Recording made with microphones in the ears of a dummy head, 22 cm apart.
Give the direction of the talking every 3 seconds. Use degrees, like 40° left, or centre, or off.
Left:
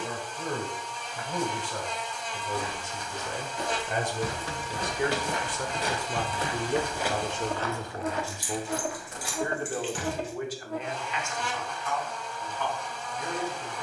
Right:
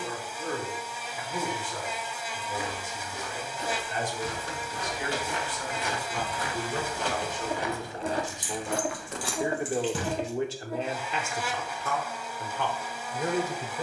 60° left, 50° left, 20° left, 30° right, 50° right.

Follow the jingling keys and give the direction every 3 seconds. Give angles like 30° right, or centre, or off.
off, 60° left, centre, 30° right, off.